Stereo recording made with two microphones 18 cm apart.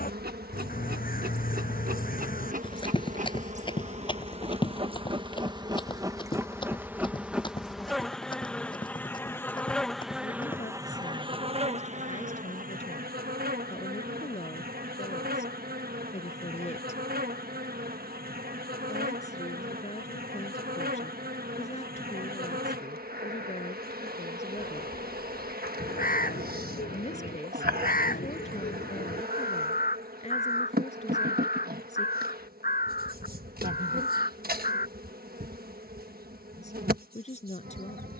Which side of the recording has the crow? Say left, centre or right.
left.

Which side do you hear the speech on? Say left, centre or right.
left.